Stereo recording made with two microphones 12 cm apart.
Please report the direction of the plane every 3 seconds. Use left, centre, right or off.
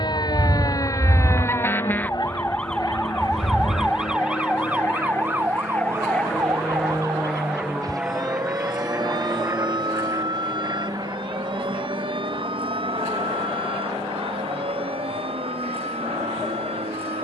left, left, centre, right, right, right.